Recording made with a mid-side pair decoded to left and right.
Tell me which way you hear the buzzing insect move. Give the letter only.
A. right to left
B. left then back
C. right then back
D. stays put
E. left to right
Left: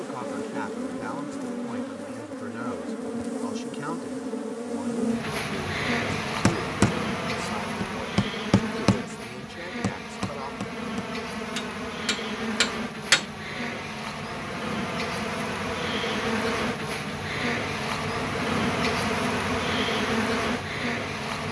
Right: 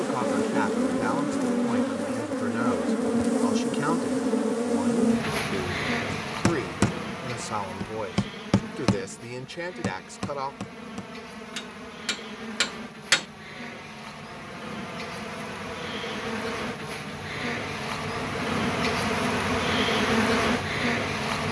B.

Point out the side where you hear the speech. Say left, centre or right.
right.